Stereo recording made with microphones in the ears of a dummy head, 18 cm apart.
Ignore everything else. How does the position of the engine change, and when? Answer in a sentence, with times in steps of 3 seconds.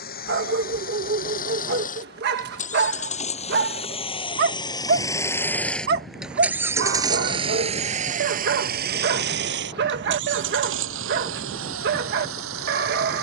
You can hear the engine on the left from 0 s and on the right from 6 s.